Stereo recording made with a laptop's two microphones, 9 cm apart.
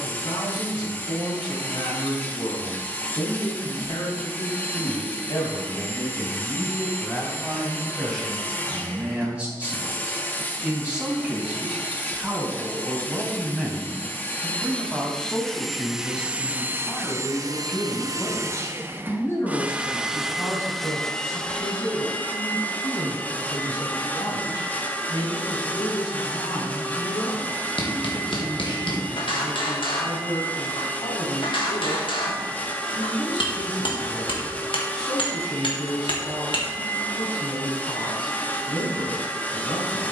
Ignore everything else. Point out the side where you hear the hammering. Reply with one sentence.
You can hear the hammering on the left.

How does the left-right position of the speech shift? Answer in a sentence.
You can hear the speech go right and come back.